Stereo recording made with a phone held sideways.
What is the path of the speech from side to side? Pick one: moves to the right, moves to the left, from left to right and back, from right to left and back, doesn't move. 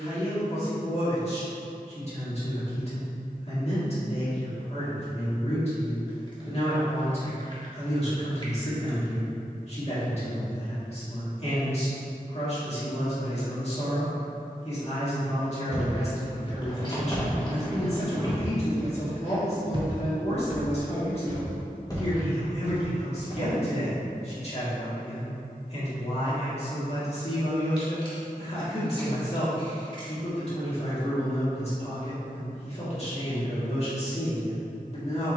doesn't move.